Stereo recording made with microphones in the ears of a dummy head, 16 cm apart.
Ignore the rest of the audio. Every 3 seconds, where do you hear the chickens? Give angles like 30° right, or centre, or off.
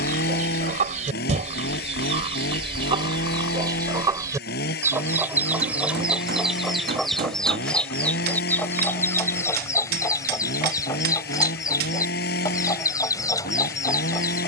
40° right, 20° right, centre, 20° left, 20° left.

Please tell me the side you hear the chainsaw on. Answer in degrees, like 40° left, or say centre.
60° left.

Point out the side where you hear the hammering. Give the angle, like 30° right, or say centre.
50° right.